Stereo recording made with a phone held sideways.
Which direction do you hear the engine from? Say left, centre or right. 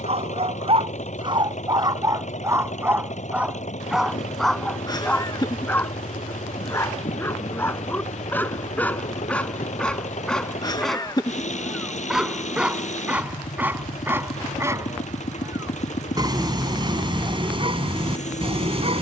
left.